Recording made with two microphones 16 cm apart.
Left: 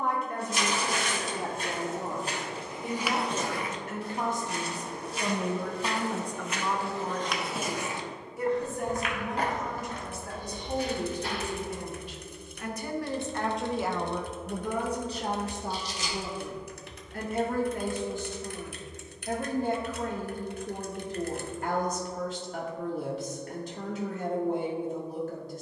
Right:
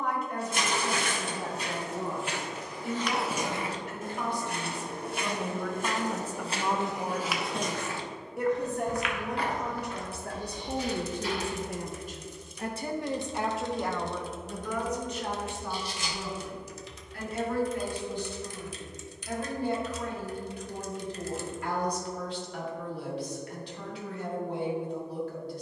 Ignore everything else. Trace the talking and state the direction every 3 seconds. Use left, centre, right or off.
left, left, right, right, centre, left, left, left, left.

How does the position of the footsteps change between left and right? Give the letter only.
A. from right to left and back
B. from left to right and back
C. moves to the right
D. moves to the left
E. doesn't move
B.